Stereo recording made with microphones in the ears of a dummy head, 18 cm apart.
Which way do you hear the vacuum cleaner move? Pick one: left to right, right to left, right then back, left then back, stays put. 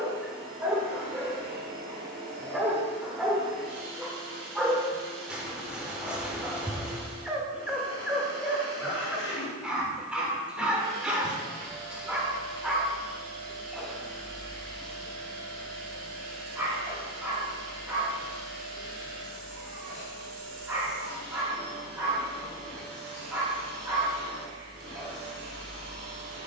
stays put.